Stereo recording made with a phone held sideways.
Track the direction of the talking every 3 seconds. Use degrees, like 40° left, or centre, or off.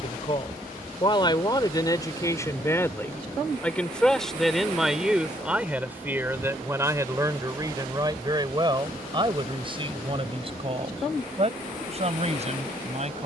30° left, centre, 20° right, 40° right, 40° right.